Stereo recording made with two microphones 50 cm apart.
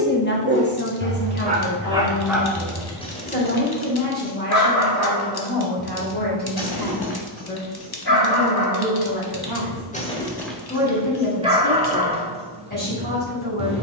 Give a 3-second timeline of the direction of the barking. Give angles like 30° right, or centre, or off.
10° right, 30° left, 50° left, centre, 10° right.